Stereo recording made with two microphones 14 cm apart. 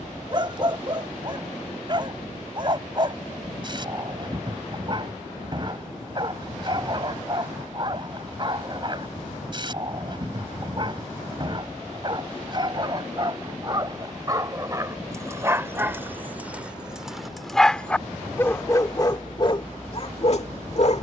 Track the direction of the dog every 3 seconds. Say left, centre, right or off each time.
right, right, right, right, right, centre, left.